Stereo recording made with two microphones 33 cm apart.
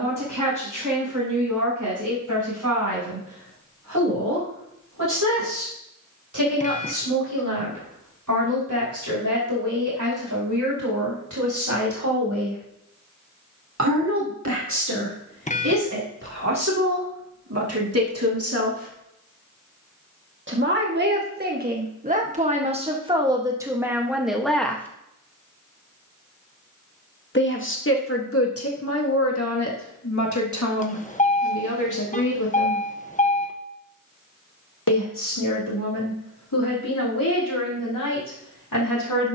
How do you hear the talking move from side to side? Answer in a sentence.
In this clip you hear the talking travel towards the left.